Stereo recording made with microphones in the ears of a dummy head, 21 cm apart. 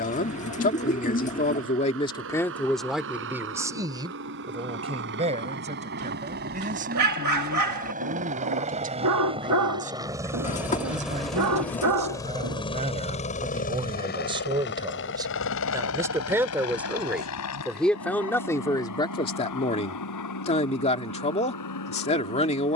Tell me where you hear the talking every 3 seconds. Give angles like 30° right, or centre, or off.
20° left, 20° right, 30° right, 30° right, 20° right, 10° right, 20° left, 30° left.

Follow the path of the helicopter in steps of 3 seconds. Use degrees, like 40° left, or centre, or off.
60° right, 50° right, 40° right, 10° right, 30° left, 60° left, 70° left, 80° left.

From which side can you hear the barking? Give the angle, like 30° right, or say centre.
80° right.